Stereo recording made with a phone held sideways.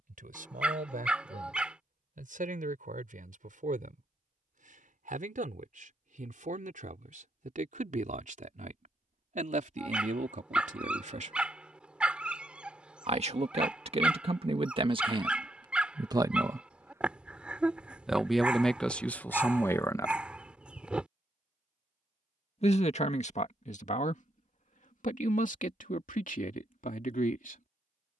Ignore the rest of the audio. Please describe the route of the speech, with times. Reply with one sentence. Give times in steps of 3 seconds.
In this clip you hear the speech on the right from 0 s, in the centre from 18 s and on the left from 21 s.